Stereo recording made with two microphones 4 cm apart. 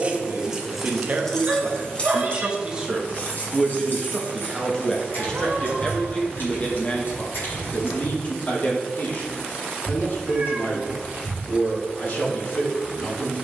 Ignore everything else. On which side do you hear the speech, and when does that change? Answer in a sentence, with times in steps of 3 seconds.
In this clip you hear the speech on the right from 0 s, in the centre from 3 s and on the left from 6 s.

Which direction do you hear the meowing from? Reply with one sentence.
In this clip you hear the meowing on the right.